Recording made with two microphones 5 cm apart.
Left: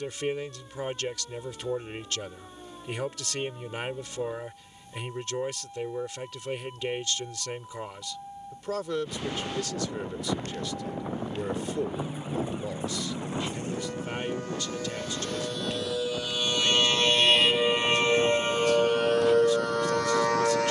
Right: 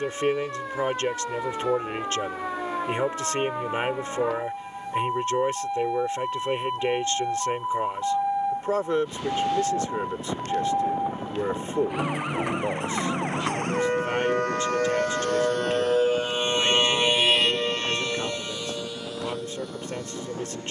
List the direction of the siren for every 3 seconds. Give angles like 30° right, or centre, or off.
80° right, 80° right, 80° right, 70° right, 60° right, 20° right, 50° left.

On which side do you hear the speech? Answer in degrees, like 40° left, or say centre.
30° right.